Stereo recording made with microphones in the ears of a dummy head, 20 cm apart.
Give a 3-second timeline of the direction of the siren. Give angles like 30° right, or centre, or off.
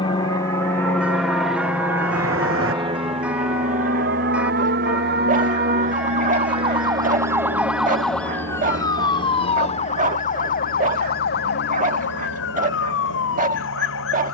70° right, 50° right, 10° right, 40° left, 60° left.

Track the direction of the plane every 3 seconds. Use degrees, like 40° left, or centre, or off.
centre, 40° right, 60° right, 70° right, 70° right.